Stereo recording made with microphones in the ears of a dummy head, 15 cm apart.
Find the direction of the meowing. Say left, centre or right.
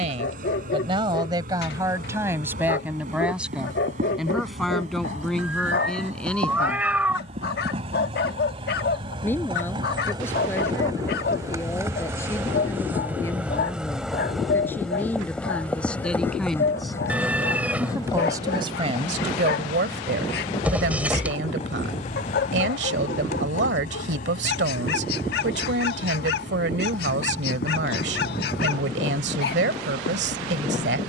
centre.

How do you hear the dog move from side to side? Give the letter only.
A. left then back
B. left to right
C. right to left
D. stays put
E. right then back
D.